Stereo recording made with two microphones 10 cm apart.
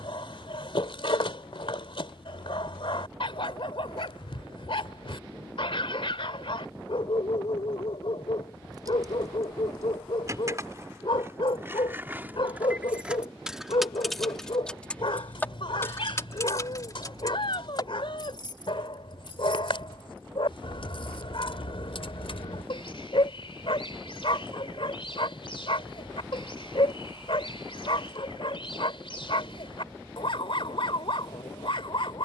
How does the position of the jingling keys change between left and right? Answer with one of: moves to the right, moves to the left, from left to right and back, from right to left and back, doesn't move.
moves to the left.